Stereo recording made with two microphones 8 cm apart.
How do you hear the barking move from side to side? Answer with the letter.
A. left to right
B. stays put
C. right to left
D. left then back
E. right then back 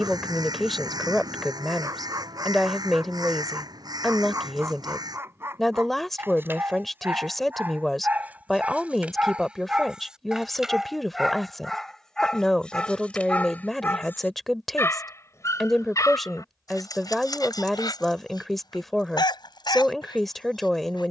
C.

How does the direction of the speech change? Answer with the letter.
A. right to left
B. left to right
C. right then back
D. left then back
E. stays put
E.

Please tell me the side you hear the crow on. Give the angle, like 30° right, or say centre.
60° right.